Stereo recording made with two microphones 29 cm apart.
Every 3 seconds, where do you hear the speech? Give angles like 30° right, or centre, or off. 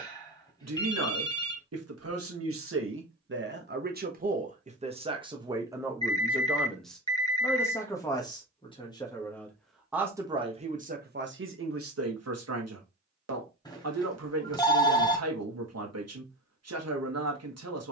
60° right, 30° right, 10° left, 20° right, 60° right, 60° right.